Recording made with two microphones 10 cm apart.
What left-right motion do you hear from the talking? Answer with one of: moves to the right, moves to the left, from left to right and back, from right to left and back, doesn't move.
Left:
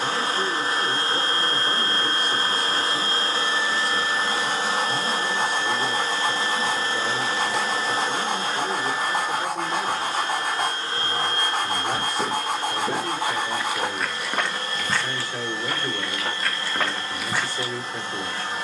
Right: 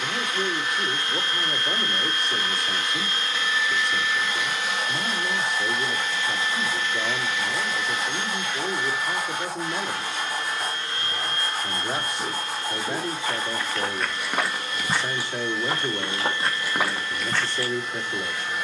doesn't move.